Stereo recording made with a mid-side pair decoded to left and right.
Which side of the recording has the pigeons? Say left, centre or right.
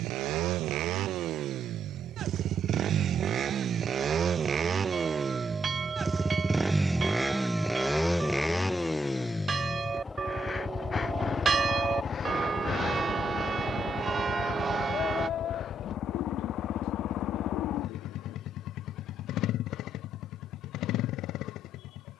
left.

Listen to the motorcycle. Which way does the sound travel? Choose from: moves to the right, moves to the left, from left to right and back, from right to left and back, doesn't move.
moves to the left.